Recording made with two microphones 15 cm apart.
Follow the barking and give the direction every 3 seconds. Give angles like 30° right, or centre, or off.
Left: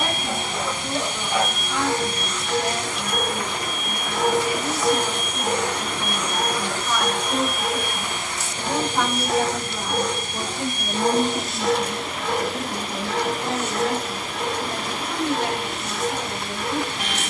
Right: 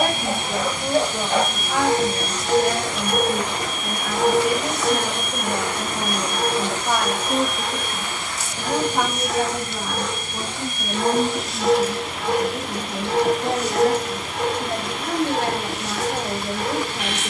50° right, centre, 40° left, 20° left, 30° right, 60° right.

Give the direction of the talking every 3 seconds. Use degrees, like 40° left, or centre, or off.
70° right, 70° right, 40° right, centre, 20° right, 70° right.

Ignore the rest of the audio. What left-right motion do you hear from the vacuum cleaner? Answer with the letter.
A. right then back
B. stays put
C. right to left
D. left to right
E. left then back
A.